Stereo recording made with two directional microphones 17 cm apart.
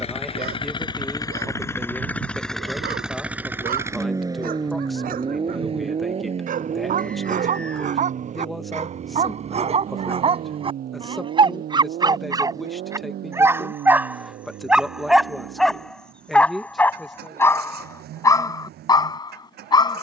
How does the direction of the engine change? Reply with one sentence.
In this clip you hear the engine move to the right.